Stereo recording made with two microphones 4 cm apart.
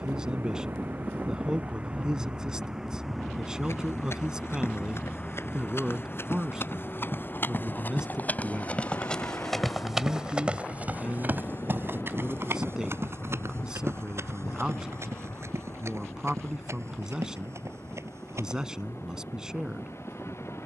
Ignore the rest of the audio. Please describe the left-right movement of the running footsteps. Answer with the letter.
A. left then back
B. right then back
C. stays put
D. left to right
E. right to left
D.